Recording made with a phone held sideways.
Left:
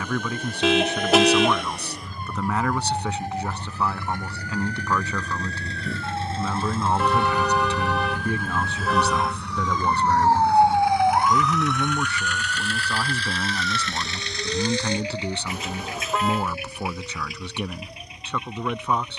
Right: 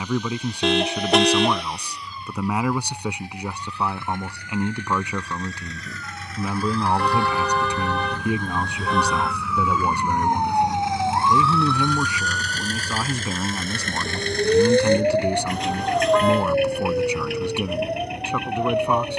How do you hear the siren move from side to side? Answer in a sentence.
You can hear the siren travel towards the right.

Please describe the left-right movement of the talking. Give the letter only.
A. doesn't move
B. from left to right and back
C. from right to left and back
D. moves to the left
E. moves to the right
A.